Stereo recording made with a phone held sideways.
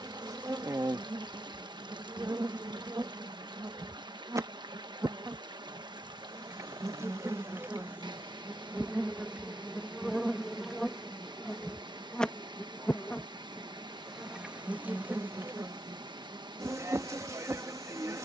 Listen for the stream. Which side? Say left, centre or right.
right.